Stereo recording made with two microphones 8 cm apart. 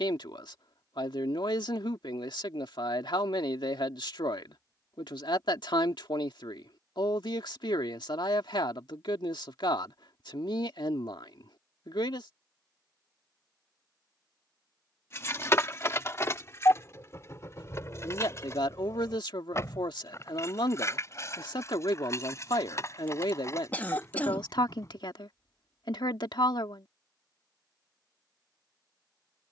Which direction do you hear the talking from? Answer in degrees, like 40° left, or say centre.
70° left.